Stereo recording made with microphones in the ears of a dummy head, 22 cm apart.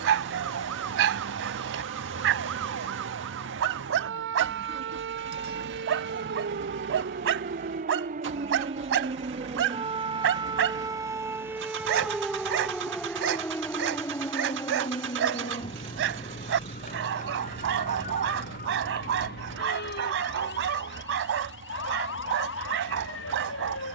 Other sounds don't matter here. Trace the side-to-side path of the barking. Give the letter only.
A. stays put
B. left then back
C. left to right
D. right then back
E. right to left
A.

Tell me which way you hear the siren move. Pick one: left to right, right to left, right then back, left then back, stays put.
right to left.